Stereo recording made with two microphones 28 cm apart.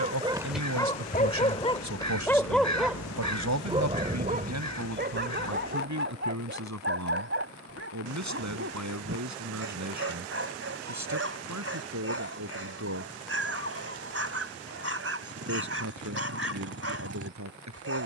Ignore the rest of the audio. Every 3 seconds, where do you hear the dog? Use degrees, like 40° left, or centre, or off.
10° left, 30° right, 50° right, 50° right, 50° right, 50° right.